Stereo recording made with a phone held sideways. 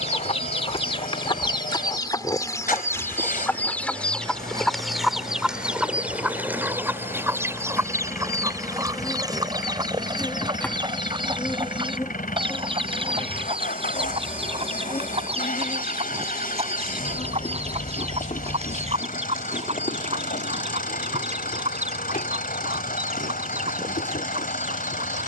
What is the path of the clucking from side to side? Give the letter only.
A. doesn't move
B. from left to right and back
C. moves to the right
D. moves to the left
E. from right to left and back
C.